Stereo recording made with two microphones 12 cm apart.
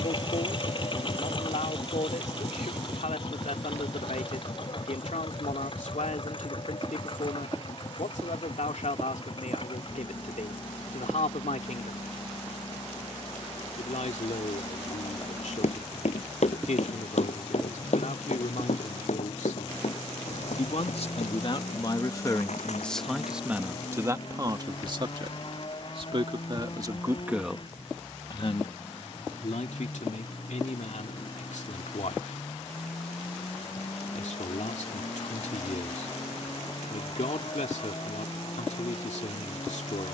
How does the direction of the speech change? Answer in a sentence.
You can hear the speech go right and come back.